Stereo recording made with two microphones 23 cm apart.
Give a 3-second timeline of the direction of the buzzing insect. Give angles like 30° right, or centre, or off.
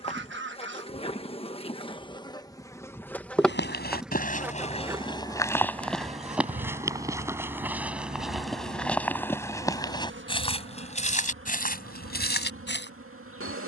20° left, 10° right, 40° right, 50° right, 60° right.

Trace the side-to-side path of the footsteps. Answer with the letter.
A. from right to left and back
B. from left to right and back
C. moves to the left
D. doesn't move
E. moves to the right
B.